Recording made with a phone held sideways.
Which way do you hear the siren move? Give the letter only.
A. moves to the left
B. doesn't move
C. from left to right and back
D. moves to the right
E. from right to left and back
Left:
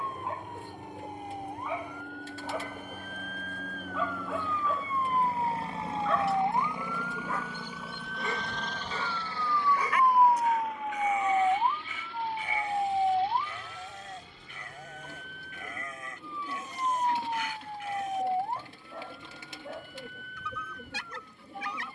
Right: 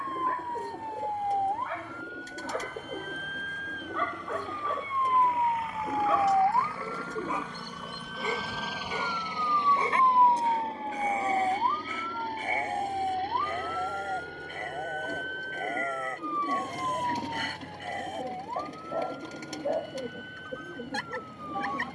A.